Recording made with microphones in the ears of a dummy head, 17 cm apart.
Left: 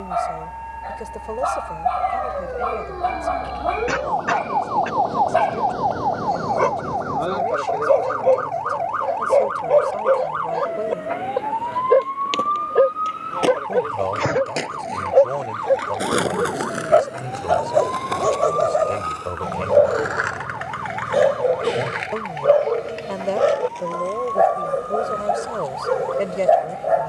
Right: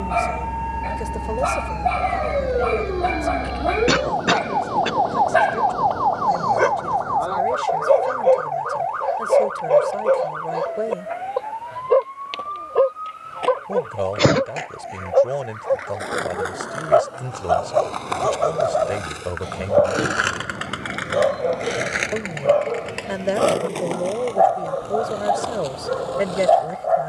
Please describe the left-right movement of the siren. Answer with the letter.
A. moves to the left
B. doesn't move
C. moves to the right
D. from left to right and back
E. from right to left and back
A.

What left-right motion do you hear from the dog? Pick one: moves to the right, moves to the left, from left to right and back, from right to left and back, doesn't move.
moves to the left.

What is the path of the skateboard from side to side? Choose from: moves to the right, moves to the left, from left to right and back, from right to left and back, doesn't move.
moves to the right.